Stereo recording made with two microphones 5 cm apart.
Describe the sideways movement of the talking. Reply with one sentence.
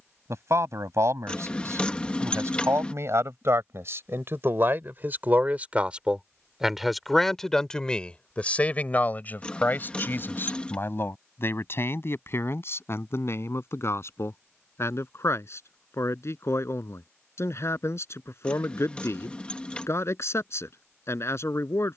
In this clip you hear the talking travel towards the left.